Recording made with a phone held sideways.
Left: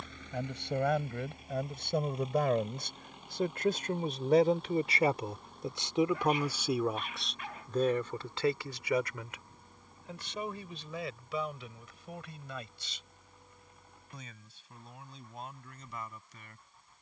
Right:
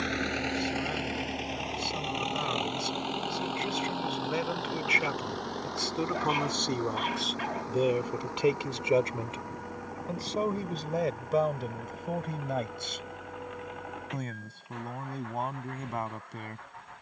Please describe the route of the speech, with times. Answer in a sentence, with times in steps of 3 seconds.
You can hear the speech on the left from 0 s, in the centre from 6 s and on the right from 9 s.